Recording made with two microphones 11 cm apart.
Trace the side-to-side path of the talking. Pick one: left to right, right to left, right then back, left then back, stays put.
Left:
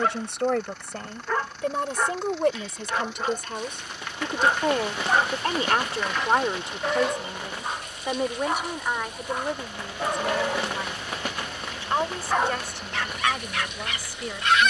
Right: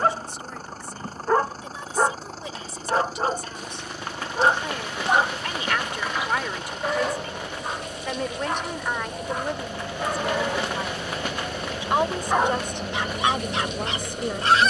left to right.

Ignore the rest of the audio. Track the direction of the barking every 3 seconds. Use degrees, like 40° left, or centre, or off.
40° right, 30° right, centre, centre, 20° right.